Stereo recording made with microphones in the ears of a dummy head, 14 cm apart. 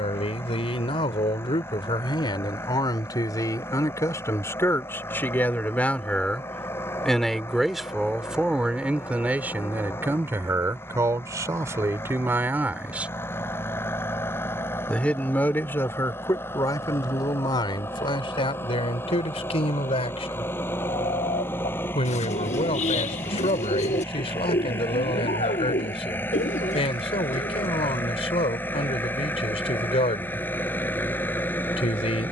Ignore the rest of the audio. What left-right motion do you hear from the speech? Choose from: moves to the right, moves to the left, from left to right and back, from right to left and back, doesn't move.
from left to right and back.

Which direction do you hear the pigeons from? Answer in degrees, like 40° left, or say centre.
40° left.